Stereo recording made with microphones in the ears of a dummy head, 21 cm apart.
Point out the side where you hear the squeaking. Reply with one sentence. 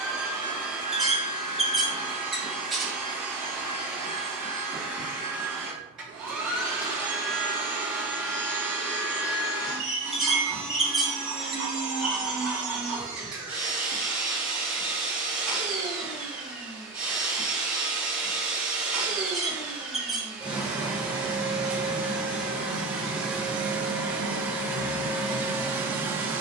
In this clip you hear the squeaking in the centre.